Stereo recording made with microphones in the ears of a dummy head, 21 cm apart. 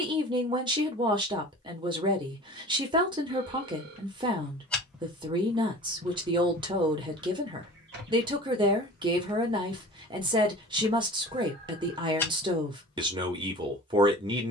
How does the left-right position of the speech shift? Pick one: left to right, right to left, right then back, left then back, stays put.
stays put.